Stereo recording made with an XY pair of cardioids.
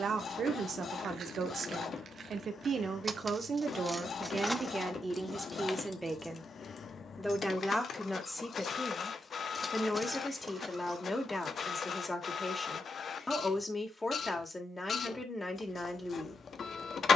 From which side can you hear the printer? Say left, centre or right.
left.